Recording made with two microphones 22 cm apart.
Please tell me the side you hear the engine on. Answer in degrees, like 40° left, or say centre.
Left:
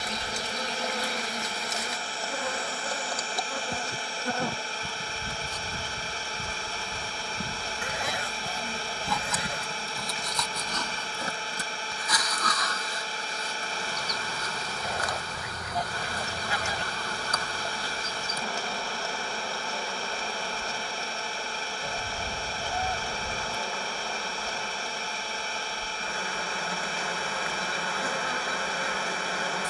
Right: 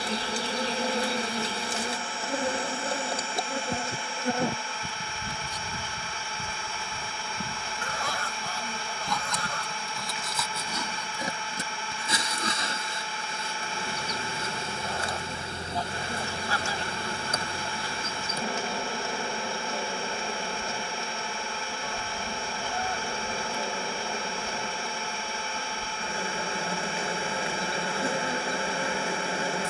40° left.